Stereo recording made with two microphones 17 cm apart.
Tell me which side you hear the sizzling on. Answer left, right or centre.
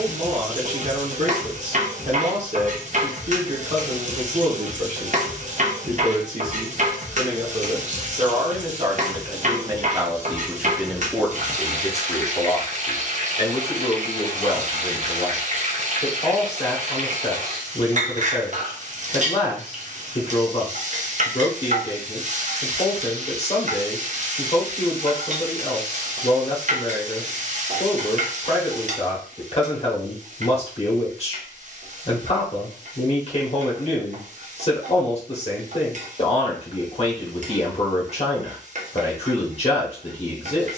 right.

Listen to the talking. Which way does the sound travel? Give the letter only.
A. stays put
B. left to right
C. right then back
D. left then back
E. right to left
E.